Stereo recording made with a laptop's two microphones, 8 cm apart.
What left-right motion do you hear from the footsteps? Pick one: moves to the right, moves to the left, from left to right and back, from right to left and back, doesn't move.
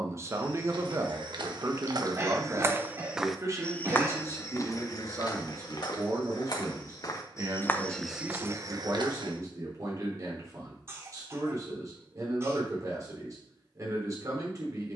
from right to left and back.